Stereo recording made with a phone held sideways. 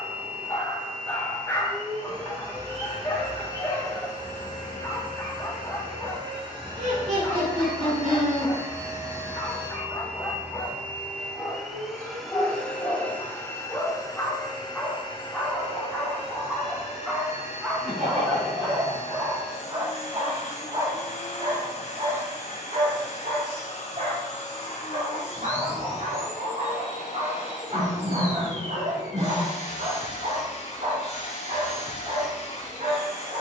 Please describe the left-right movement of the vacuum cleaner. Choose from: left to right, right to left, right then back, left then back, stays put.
right to left.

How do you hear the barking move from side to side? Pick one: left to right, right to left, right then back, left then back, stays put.
left to right.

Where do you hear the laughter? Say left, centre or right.
right.